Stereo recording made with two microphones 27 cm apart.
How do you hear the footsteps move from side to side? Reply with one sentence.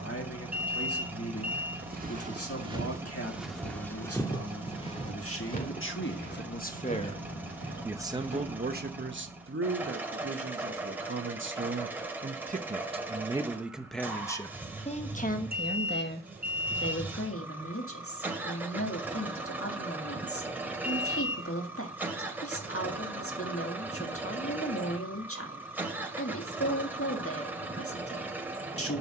In this clip you hear the footsteps move to the left.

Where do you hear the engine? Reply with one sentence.
In this clip you hear the engine in the centre.